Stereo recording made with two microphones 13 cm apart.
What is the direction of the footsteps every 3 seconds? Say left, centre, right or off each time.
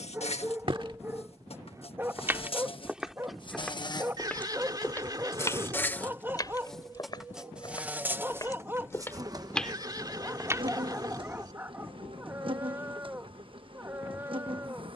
right, centre, left, centre, off.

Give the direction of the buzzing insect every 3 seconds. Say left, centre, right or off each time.
left, left, centre, right, right.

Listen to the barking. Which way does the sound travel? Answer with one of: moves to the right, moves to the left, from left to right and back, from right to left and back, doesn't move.
doesn't move.